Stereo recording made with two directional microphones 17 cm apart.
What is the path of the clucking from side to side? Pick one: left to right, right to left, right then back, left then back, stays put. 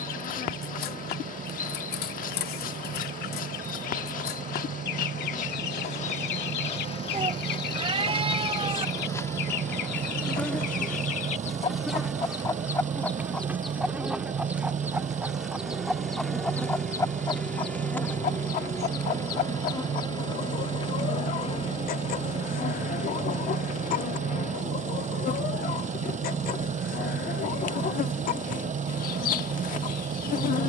right then back.